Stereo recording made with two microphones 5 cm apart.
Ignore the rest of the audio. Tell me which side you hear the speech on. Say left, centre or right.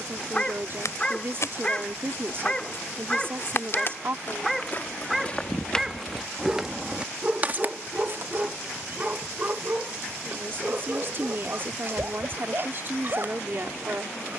right.